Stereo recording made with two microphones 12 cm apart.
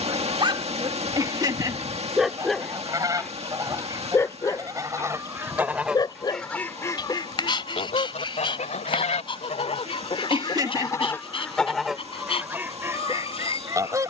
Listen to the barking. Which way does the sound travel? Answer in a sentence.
You can hear the barking move from right to left.